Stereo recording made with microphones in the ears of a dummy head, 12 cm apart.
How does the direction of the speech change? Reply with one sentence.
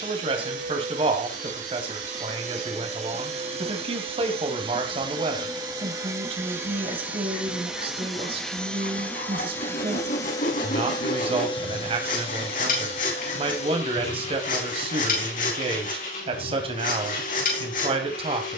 You can hear the speech stay put.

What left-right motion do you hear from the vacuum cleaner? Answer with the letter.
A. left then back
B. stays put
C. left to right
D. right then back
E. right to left
E.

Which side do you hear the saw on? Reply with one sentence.
In this clip you hear the saw on the left.